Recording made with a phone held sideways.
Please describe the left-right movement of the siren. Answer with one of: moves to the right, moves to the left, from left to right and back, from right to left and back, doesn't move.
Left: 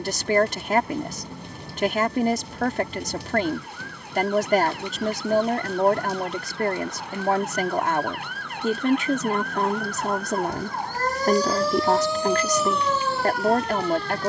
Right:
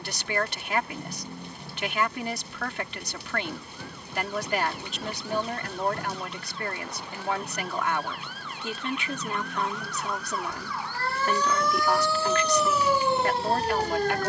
moves to the right.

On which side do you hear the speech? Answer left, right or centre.
left.